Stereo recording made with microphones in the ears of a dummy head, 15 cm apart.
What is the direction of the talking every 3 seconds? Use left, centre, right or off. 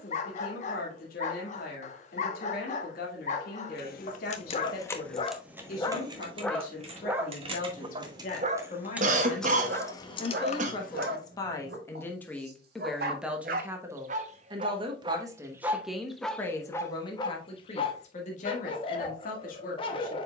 left, left, left, left, centre, centre, left.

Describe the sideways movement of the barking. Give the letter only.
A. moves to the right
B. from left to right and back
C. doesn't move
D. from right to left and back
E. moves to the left
B.